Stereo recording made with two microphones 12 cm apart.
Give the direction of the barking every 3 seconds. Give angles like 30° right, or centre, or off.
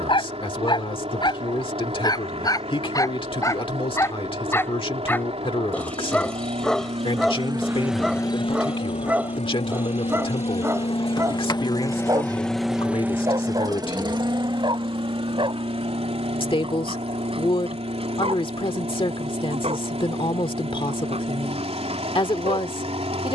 40° left, 20° left, centre, 20° right, 40° right, 50° right, 50° right, 60° right.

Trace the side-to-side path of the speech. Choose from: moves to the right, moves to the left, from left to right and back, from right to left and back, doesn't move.
doesn't move.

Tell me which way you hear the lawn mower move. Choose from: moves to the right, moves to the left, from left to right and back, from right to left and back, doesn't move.
from right to left and back.